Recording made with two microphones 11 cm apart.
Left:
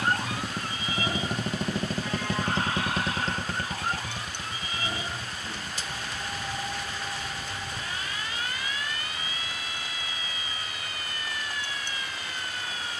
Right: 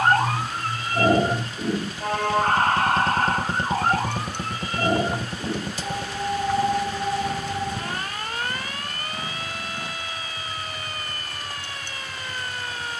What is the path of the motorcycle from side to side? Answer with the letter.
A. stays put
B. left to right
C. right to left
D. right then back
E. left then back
B.